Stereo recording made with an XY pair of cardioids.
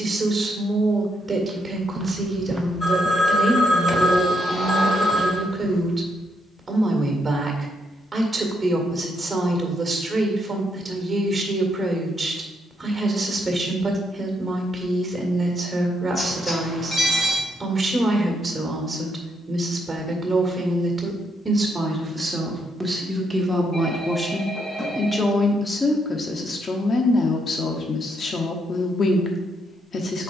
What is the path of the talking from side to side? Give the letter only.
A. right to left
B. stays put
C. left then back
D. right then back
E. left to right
A.